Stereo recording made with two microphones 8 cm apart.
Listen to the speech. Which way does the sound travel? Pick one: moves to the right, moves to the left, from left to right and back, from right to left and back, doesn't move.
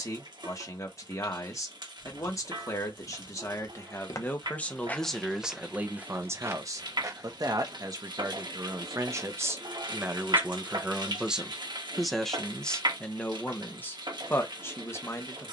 from left to right and back.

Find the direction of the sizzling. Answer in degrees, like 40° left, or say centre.
80° right.